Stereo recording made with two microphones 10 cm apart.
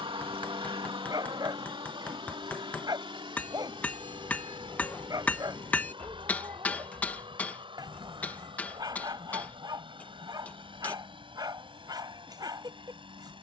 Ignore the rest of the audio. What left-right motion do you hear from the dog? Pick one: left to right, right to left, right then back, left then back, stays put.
stays put.